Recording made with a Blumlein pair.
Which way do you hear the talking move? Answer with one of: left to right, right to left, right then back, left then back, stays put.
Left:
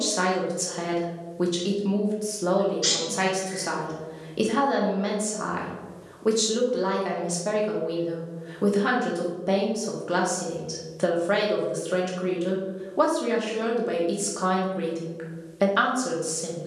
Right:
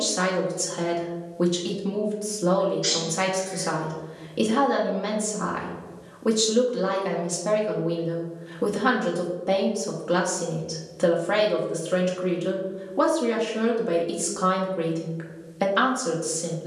stays put.